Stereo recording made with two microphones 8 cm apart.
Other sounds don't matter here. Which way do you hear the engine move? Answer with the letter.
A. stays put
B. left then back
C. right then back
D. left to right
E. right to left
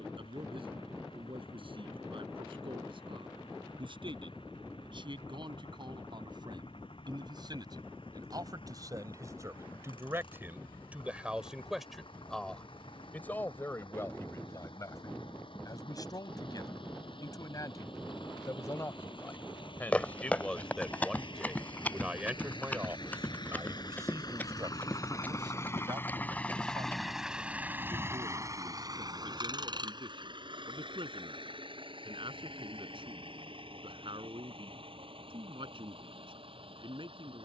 D.